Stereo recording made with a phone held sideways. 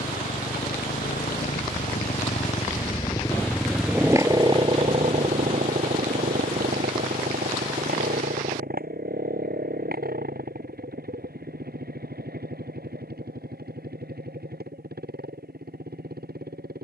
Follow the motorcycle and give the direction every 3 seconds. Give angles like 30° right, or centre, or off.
60° left, 20° right, 70° right, 70° right, 80° right, 80° right.